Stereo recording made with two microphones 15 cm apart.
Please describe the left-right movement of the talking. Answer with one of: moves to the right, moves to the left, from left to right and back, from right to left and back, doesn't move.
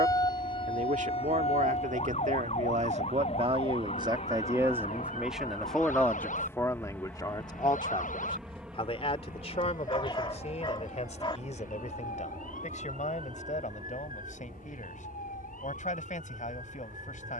moves to the left.